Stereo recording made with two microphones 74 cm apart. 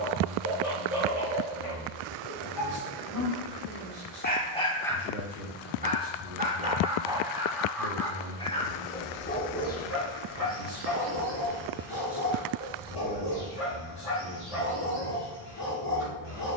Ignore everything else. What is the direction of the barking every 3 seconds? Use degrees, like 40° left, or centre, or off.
40° left, 10° left, centre, 30° left, 40° left, 50° left.